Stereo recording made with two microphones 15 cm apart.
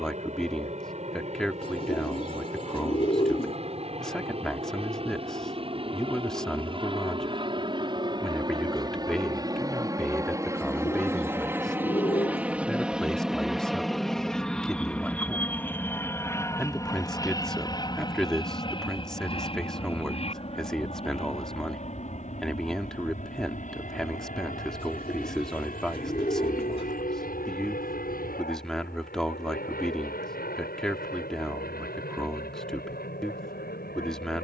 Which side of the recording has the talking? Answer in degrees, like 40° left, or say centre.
centre.